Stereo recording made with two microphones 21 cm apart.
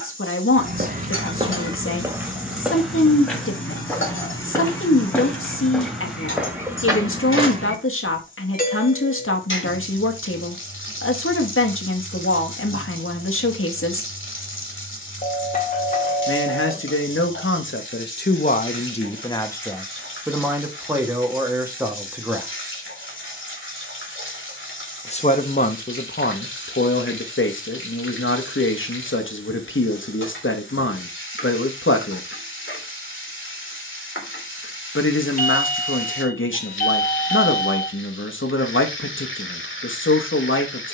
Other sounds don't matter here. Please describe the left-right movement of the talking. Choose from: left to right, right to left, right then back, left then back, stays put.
right then back.